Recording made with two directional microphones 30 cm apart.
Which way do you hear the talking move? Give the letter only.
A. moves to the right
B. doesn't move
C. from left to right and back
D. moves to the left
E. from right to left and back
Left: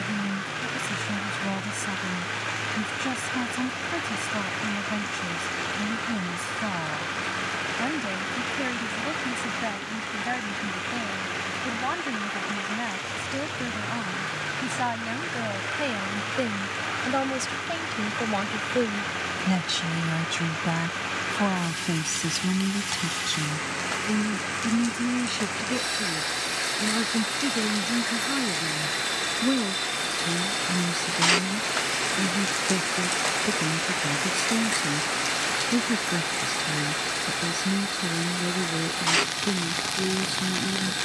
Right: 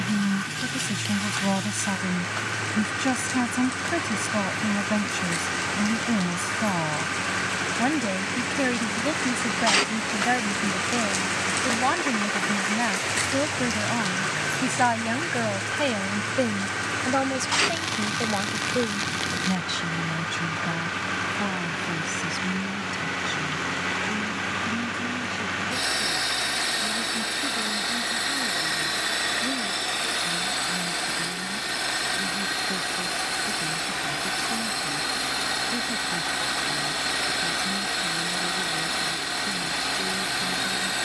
D.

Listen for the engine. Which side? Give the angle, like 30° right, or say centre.
30° right.